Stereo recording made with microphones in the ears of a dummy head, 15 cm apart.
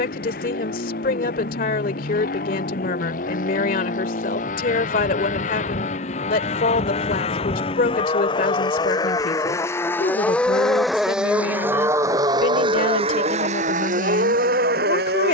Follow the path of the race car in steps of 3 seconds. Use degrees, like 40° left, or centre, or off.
50° left, 50° left, 30° left, 10° left, 40° right.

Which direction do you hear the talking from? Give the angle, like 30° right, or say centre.
50° left.